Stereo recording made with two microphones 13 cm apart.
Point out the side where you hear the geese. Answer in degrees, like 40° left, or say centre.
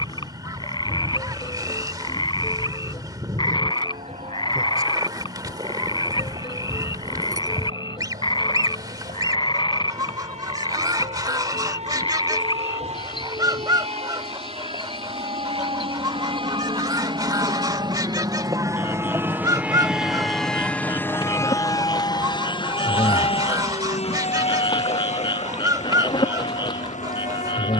30° right.